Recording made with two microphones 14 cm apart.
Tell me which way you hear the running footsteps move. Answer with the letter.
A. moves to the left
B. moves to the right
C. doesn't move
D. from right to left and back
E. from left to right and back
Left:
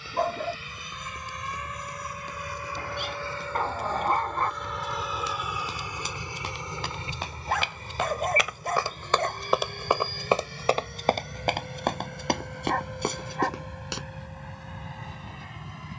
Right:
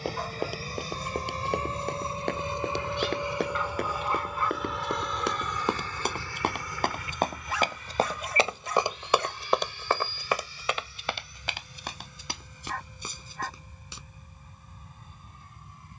A.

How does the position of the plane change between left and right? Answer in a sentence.
In this clip you hear the plane travel towards the left.